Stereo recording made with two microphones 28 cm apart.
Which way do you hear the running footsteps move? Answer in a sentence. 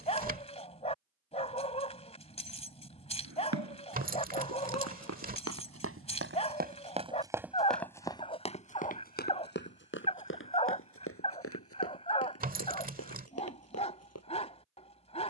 In this clip you hear the running footsteps move to the left.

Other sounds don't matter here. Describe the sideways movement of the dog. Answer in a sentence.
In this clip you hear the dog stay in one place.